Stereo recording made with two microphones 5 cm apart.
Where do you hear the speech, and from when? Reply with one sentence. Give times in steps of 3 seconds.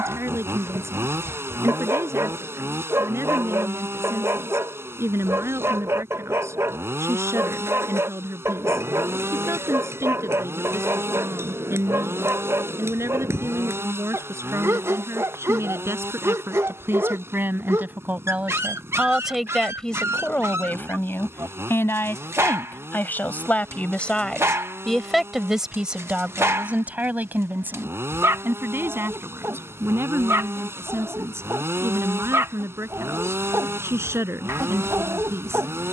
You can hear the speech on the right from 0 s, in the centre from 18 s, on the left from 21 s, in the centre from 24 s and on the right from 27 s.